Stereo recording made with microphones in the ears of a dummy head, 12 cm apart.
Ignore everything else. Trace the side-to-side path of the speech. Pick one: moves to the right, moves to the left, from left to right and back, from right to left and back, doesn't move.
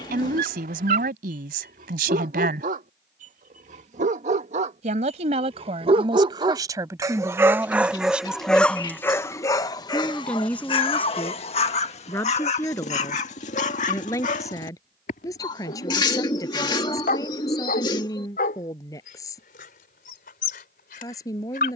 moves to the left.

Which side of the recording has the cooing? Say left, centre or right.
left.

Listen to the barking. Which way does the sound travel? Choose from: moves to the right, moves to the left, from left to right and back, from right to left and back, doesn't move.
moves to the left.